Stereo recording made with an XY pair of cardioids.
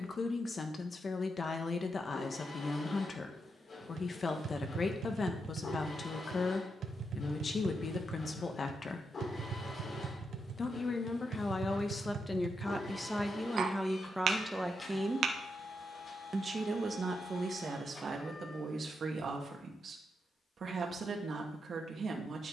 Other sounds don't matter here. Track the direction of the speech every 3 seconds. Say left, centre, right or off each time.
left, left, left, left, centre, right, right, right.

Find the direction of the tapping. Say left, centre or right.
right.